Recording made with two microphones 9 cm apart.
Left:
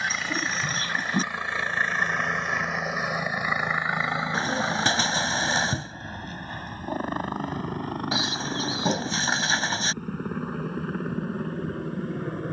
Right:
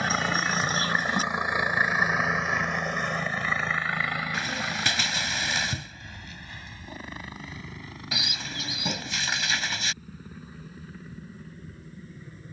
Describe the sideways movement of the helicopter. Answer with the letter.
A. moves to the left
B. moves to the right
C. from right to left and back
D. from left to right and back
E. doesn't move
A.